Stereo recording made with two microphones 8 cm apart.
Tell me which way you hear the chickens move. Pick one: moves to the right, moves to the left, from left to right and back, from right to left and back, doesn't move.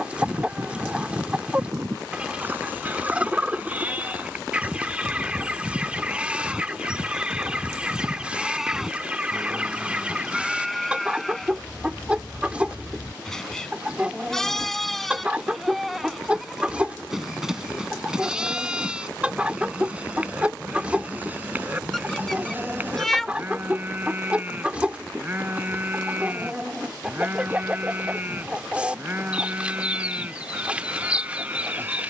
doesn't move.